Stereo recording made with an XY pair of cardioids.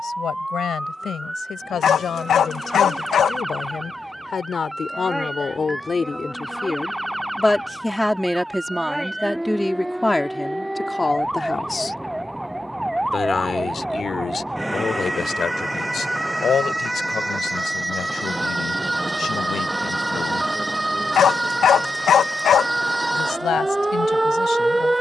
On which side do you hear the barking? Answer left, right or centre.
left.